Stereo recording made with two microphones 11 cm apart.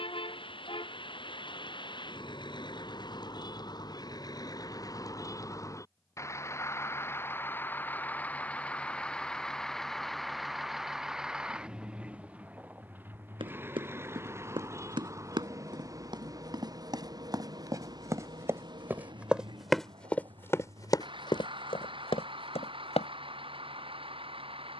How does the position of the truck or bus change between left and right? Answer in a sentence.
You can hear the truck or bus move from left to right.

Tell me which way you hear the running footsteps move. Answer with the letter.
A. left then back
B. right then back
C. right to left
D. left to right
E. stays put
C.